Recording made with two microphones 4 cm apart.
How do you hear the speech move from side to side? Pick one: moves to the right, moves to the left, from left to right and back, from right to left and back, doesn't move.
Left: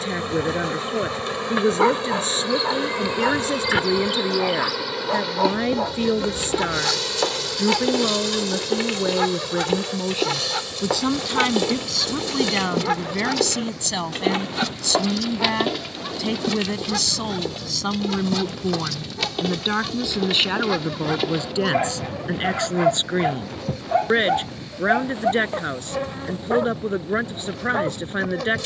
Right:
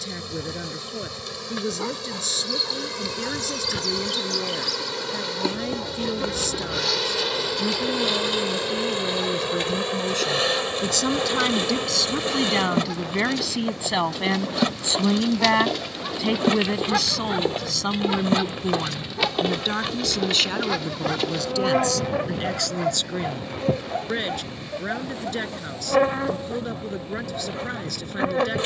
from left to right and back.